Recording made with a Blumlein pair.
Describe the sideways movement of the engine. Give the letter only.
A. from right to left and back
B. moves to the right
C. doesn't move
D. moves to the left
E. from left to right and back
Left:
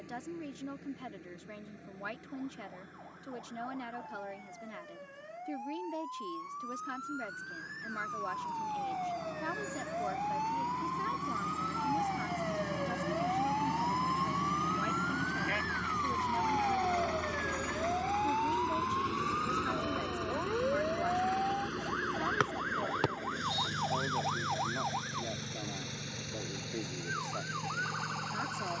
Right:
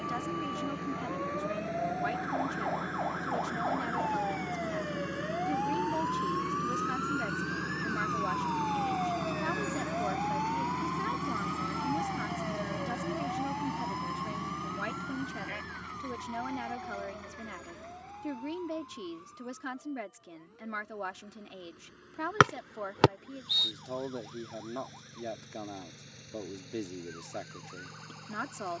D.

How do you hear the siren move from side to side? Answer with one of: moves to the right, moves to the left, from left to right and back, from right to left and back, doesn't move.
moves to the left.